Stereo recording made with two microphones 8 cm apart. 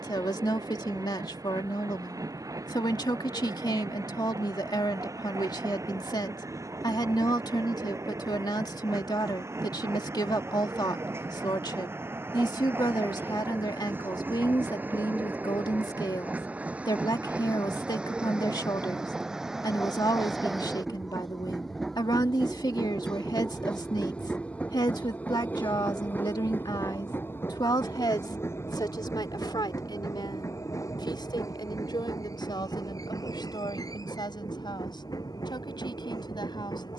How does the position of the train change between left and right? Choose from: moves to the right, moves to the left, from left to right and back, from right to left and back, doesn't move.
moves to the left.